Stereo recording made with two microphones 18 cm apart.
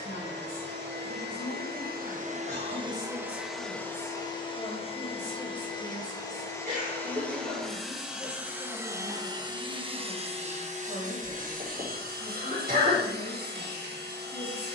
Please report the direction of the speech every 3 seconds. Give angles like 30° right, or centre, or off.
50° left, 20° left, 10° right, 30° right, 50° right.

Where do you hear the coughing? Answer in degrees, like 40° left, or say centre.
50° right.